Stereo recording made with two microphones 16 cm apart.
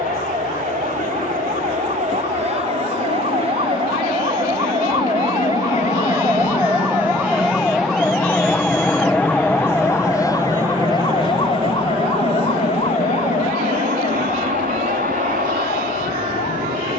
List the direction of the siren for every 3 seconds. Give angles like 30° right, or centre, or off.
50° right, 30° right, centre, 20° left, 40° left, 50° left.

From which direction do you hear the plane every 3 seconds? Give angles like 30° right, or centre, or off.
70° left, 60° left, 30° left, 20° right, 50° right, 60° right.